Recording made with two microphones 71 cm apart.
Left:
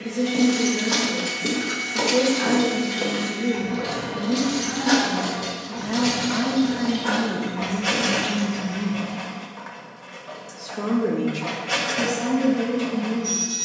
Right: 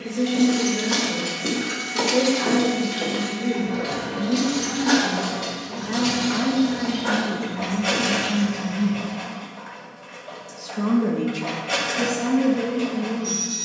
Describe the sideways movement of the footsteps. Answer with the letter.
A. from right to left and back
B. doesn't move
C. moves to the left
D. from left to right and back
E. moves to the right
A.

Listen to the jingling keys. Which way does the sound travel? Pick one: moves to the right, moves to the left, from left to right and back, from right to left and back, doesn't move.
moves to the right.